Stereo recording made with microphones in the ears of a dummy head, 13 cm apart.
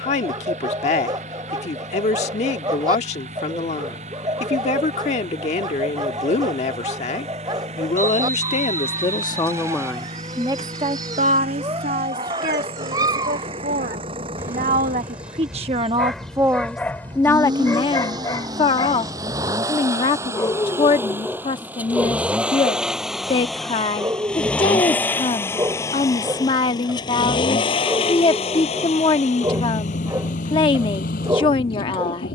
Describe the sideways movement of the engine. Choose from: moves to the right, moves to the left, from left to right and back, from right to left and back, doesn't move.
moves to the left.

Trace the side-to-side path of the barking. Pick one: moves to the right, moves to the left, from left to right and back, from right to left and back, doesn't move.
from right to left and back.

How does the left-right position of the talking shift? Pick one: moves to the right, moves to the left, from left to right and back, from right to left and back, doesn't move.
from left to right and back.